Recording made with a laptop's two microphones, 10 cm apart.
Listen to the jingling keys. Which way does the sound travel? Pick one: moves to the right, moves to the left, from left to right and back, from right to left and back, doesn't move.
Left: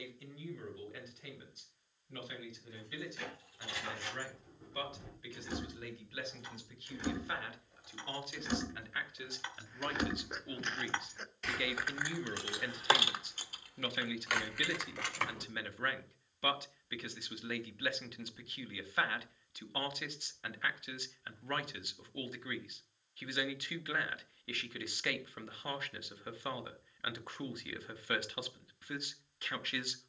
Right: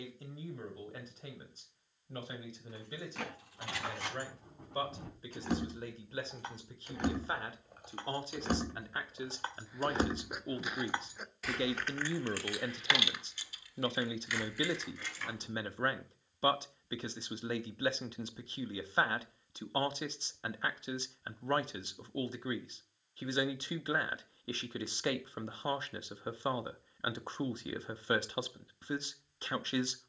moves to the left.